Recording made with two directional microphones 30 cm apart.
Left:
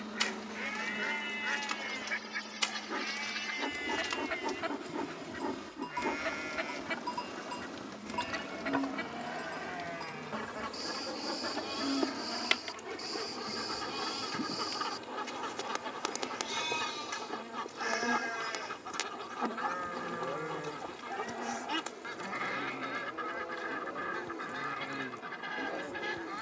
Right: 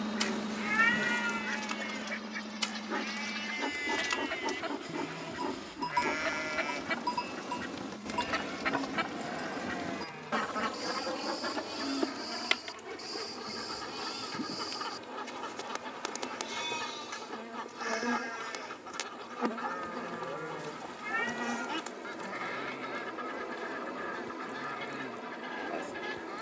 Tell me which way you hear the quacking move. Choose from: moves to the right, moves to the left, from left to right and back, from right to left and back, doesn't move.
from left to right and back.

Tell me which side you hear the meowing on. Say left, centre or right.
right.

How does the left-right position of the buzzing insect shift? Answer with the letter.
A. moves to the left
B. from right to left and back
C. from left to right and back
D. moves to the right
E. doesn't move
B.